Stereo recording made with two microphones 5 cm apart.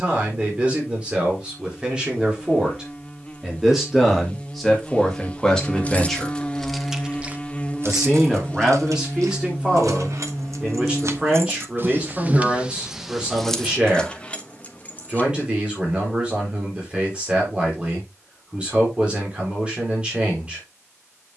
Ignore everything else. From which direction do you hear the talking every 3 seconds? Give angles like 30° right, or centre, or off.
20° right, centre, 10° right, 20° right, 20° right, 20° right, 20° right.